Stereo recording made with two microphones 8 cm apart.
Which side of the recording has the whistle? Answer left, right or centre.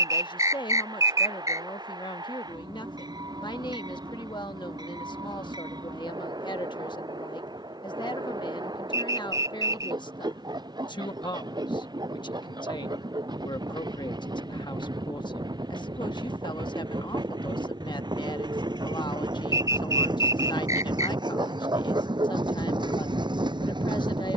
right.